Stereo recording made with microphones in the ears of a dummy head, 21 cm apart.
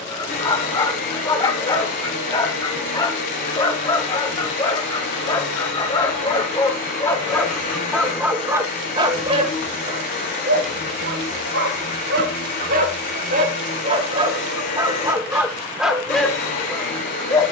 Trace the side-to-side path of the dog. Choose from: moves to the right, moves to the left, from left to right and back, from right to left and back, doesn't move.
from left to right and back.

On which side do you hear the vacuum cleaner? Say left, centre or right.
left.